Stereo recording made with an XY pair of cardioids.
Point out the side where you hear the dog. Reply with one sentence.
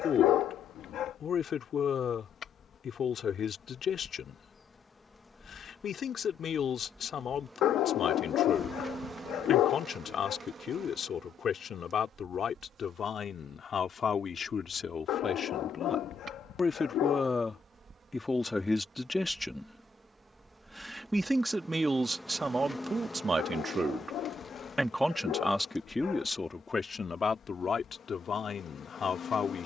In this clip you hear the dog on the left.